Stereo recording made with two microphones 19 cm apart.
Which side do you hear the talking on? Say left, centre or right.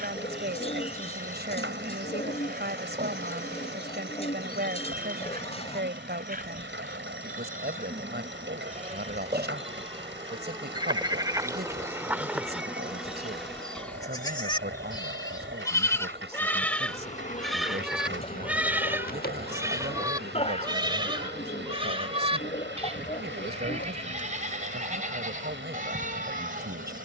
right.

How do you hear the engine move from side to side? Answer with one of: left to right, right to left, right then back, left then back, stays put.
stays put.